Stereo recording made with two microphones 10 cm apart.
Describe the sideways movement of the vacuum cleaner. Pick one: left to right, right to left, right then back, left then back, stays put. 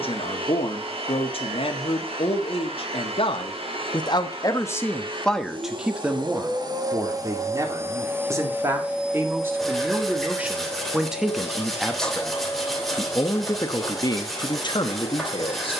right to left.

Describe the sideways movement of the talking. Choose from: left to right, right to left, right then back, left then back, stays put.
right then back.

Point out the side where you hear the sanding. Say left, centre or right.
centre.